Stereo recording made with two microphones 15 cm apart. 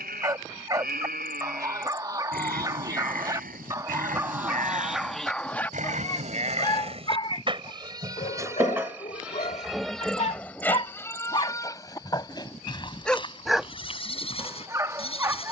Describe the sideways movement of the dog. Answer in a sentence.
You can hear the dog go left and come back.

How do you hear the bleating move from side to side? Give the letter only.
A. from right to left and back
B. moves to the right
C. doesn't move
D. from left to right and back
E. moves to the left
E.